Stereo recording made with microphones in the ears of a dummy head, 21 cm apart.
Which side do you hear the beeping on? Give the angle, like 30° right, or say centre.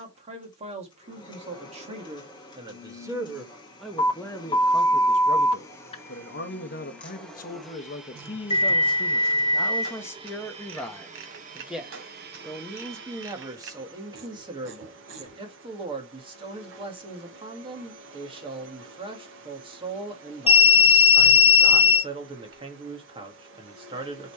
20° left.